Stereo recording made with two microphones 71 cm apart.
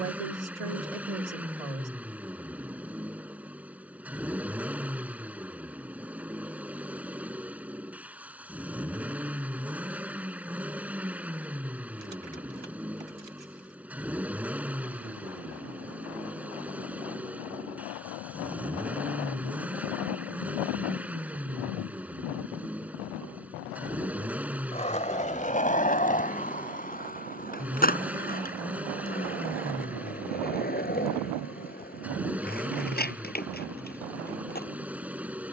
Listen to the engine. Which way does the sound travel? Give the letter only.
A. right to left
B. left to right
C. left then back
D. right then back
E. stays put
E.